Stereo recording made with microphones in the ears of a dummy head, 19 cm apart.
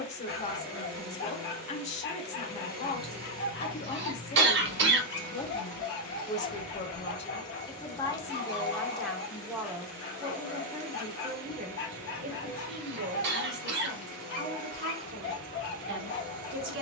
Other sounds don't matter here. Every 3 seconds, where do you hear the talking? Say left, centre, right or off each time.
left, left, left, right, right, right.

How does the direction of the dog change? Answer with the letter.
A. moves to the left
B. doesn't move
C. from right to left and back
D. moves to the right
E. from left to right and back
B.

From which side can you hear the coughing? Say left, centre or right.
right.